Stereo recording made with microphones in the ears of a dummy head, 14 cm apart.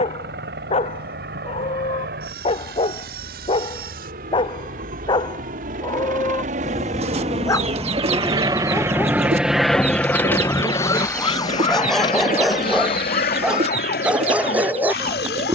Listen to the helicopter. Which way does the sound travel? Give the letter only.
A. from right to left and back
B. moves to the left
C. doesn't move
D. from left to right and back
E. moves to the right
B.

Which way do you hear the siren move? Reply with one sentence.
In this clip you hear the siren go from the right side to the left.